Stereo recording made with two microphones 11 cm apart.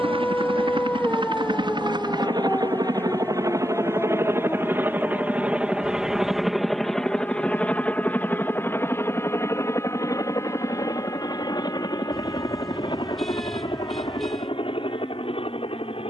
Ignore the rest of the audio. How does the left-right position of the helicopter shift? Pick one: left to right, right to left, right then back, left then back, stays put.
right to left.